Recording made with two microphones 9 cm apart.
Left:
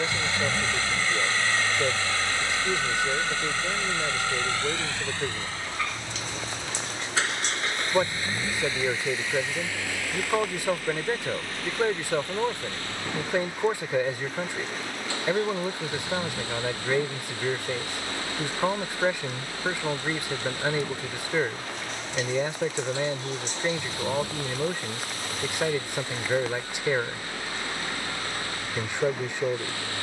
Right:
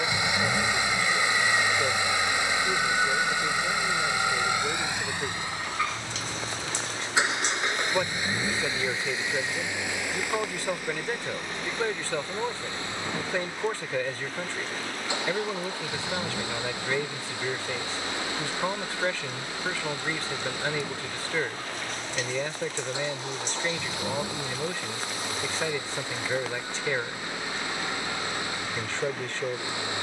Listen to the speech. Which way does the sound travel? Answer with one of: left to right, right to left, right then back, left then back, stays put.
stays put.